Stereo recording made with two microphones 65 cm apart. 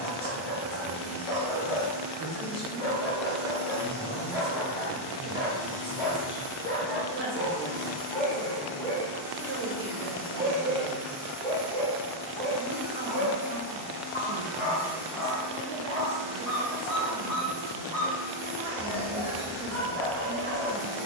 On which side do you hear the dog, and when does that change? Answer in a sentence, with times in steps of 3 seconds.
You can hear the dog on the left from 0 s, in the centre from 9 s and on the left from 12 s.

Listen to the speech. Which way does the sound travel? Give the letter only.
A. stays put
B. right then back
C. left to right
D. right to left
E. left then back
A.